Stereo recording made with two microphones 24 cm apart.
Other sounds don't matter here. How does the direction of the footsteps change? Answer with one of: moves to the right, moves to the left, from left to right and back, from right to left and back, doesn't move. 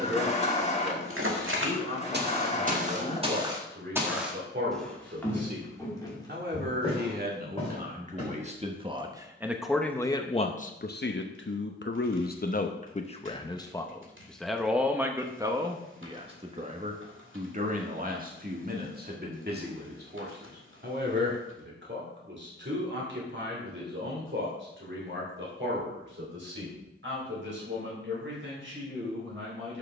moves to the left.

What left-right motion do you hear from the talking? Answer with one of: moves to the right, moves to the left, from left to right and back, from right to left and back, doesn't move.
from right to left and back.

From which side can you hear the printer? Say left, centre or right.
left.